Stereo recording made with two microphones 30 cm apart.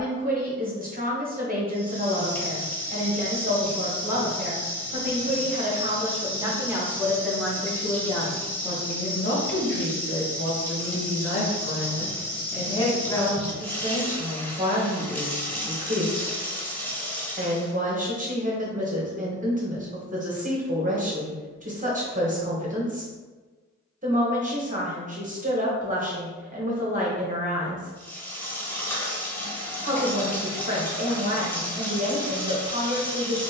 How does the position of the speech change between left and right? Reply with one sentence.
In this clip you hear the speech move from right to left and back again.